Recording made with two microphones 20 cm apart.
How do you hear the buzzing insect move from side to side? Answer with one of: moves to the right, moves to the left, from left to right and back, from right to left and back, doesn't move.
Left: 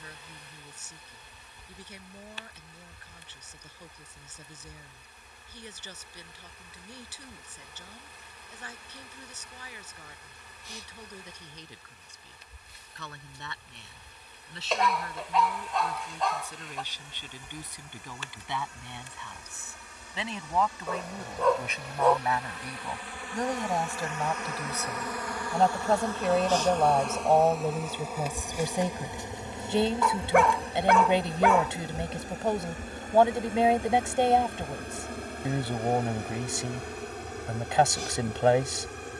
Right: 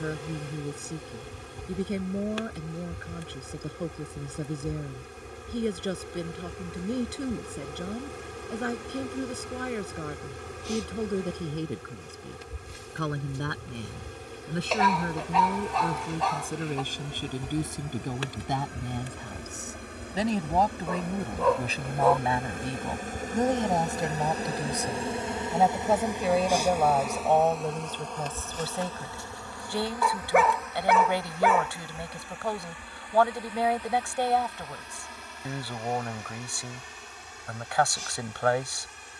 moves to the left.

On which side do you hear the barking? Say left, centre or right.
centre.